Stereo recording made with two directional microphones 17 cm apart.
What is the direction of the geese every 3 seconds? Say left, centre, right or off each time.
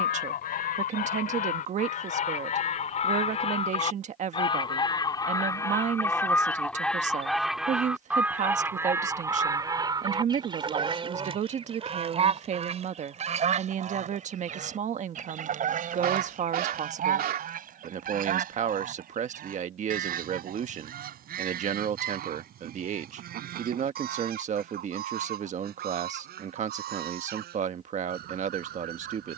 left, left, centre, right, right, right, right, right, right, right.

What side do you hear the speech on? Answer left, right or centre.
right.